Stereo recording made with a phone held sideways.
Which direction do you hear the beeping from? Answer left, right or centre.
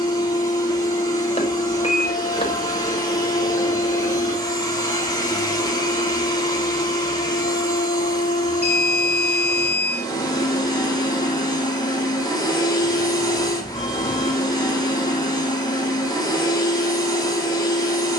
left.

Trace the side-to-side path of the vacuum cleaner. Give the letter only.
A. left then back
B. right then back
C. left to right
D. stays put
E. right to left
D.